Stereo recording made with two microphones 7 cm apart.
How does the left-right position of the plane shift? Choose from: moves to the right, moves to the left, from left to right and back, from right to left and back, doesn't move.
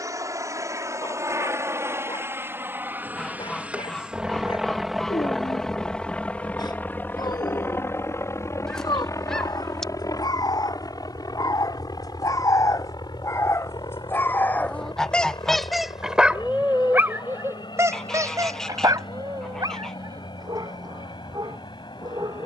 moves to the left.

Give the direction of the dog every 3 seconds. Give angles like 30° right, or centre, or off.
80° left, 80° left, 70° left, 60° left, 40° left, 20° right, 60° right, 70° right.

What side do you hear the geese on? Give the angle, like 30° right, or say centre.
10° left.